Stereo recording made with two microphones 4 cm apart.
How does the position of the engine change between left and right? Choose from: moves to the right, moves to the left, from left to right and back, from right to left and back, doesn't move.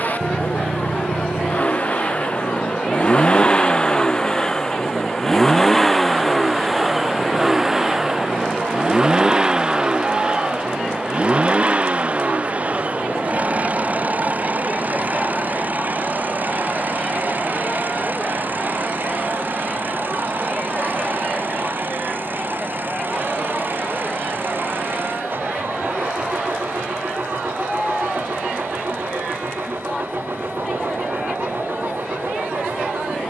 moves to the right.